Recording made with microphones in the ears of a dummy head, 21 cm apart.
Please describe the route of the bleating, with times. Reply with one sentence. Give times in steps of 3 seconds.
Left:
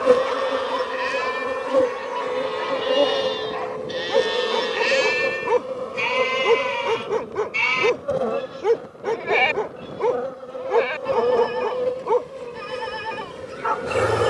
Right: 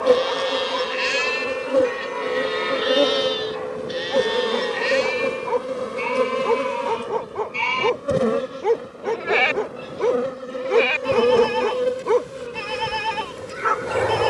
You can hear the bleating on the right from 0 s, in the centre from 3 s, on the left from 6 s and on the right from 9 s.